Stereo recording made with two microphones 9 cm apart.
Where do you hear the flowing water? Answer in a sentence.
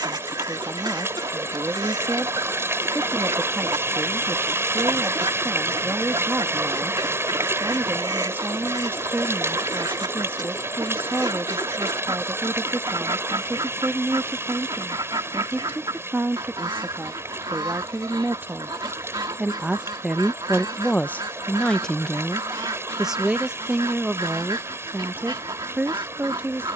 You can hear the flowing water on the right.